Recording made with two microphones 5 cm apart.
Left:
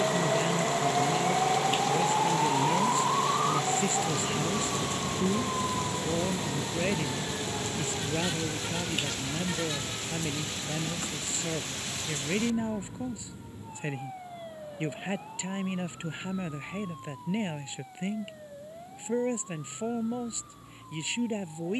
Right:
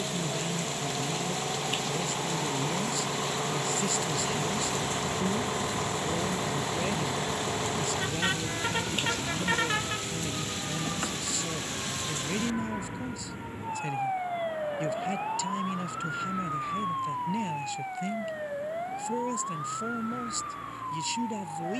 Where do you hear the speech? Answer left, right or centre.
left.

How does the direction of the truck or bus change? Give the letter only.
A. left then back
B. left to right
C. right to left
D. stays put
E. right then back
B.